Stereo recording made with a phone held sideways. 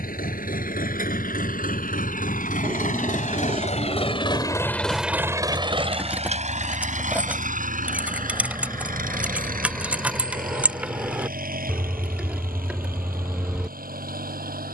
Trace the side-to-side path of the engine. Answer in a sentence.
In this clip you hear the engine move to the right.